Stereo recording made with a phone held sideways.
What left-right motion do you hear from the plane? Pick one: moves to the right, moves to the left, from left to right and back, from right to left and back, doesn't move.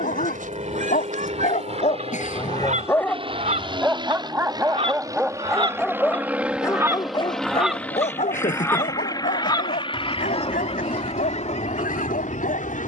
moves to the left.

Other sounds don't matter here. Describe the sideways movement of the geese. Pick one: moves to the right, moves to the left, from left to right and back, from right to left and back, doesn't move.
moves to the left.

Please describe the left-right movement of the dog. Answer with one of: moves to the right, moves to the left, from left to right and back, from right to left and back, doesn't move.
from left to right and back.